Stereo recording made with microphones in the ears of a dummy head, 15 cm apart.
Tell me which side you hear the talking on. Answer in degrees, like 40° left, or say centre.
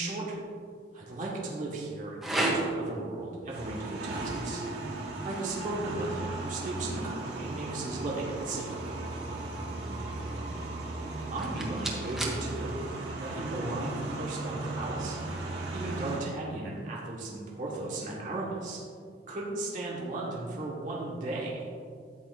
50° right.